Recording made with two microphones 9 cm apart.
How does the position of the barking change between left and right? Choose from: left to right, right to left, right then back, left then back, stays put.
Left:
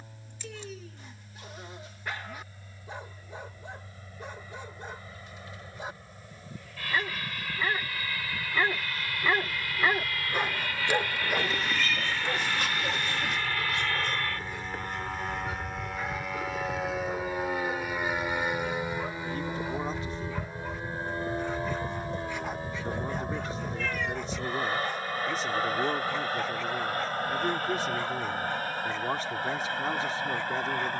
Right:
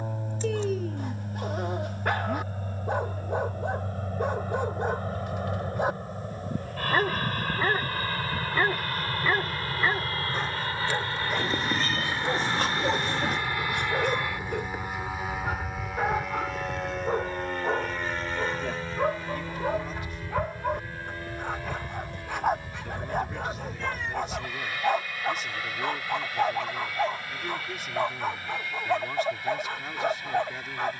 left then back.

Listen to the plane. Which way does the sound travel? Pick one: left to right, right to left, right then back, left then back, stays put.
right to left.